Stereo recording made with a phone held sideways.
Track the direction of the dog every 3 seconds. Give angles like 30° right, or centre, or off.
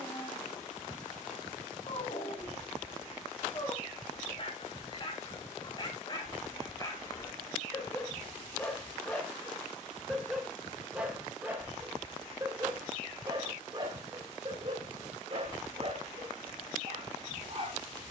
50° left, 40° left, 20° left, centre, 30° right, 40° right.